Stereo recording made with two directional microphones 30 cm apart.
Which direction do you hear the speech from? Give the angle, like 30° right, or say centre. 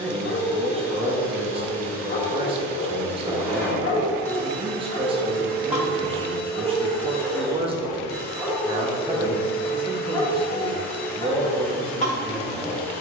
20° right.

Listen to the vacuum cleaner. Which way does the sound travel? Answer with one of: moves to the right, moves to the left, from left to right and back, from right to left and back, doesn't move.
doesn't move.